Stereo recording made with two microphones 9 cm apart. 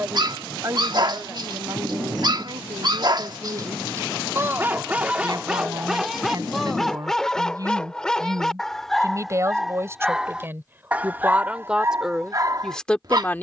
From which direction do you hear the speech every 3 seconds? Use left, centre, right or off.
right, right, right, right, centre.